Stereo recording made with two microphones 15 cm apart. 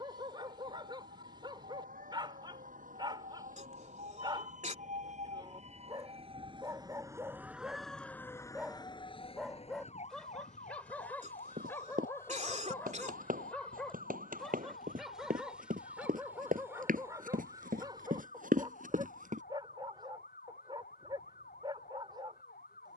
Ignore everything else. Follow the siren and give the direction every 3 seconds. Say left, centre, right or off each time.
right, right, centre, left, left, left, left, left.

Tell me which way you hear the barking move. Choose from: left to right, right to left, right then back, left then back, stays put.
left then back.